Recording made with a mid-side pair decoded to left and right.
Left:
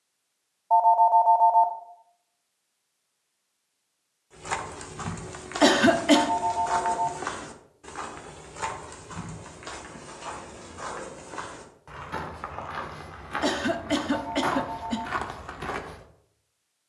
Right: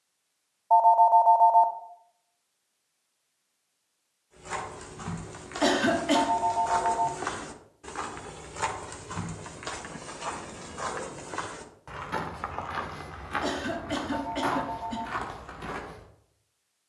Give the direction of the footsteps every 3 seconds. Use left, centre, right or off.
off, left, centre, right, centre, left.